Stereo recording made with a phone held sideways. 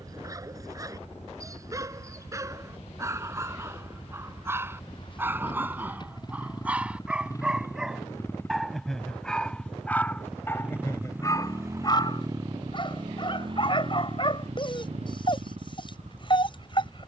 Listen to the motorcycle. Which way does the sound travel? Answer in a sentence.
In this clip you hear the motorcycle move from left to right.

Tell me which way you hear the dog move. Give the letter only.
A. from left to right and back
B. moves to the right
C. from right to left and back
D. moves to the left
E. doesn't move
D.